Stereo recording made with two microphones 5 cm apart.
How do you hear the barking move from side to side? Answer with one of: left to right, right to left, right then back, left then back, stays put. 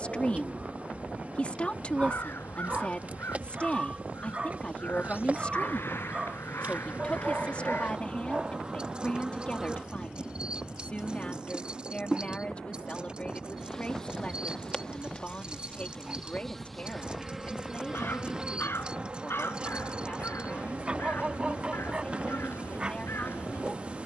stays put.